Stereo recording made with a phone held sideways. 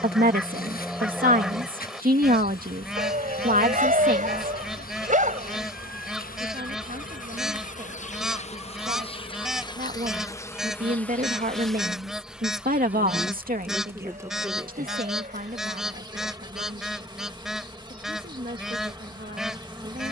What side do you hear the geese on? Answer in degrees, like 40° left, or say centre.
centre.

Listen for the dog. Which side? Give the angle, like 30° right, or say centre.
60° right.